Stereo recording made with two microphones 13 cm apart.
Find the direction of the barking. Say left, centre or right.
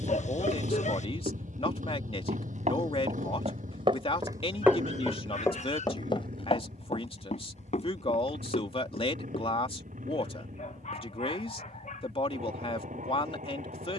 left.